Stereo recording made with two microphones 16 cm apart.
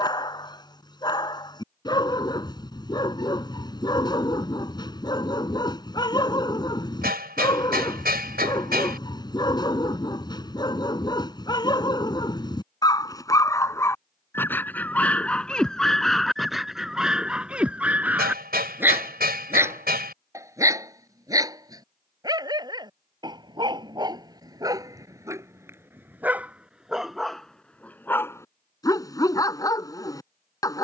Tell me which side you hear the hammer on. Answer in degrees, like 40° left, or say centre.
80° right.